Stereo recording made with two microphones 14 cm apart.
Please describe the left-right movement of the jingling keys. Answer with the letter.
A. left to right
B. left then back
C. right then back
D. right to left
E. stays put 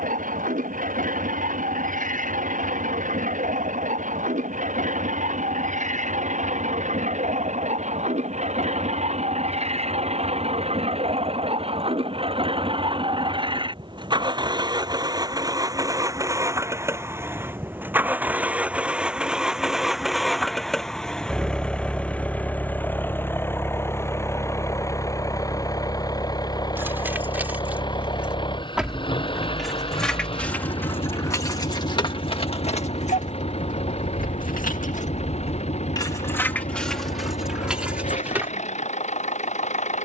B.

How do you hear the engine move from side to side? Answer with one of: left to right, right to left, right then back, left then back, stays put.
right to left.